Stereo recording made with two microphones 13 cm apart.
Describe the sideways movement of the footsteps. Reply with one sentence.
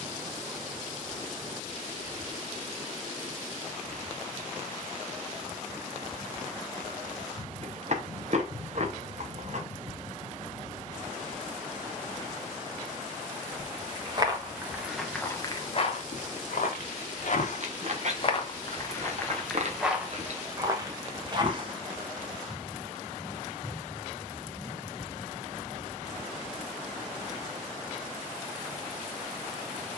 You can hear the footsteps move from right to left and back again.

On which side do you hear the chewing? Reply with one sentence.
In this clip you hear the chewing on the right.